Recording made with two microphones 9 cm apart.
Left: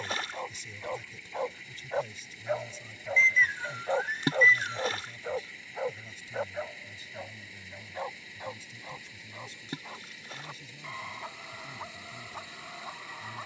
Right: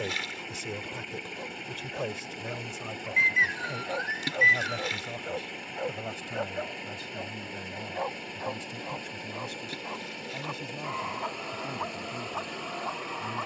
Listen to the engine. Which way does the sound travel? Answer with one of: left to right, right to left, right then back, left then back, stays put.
stays put.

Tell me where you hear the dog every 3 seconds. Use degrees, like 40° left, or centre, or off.
40° left, 20° left, 10° right, 30° right, 30° right.